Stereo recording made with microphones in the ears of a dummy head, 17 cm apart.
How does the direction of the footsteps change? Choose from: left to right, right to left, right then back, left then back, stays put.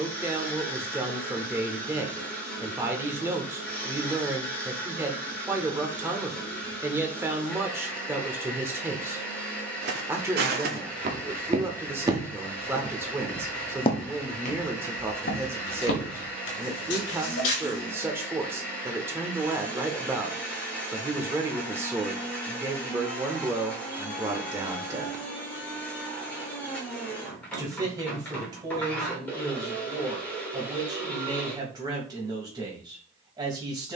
right to left.